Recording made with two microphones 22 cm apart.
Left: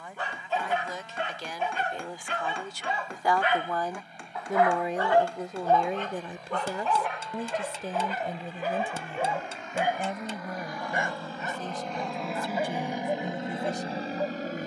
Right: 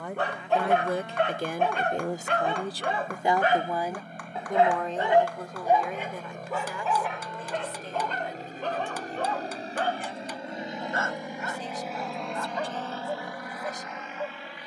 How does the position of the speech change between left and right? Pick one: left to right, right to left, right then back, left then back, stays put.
right to left.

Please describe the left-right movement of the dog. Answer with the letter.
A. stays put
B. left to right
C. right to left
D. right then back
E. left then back
C.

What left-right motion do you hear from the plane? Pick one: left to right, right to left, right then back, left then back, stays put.
right to left.